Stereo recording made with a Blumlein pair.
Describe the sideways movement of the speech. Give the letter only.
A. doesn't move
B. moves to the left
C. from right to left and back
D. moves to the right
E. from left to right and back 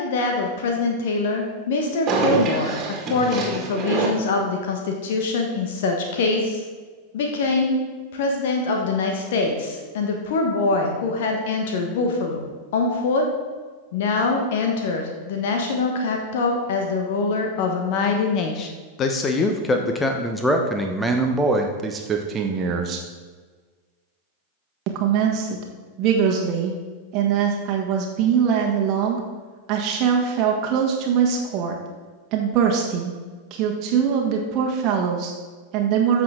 D.